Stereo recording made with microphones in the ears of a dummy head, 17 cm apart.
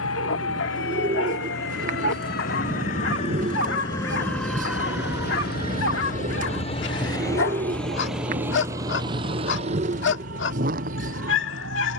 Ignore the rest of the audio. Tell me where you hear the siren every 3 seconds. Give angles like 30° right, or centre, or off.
60° left, centre, 50° right, 70° right.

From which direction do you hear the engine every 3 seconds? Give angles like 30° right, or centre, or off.
80° left, 60° left, 10° left, 40° right.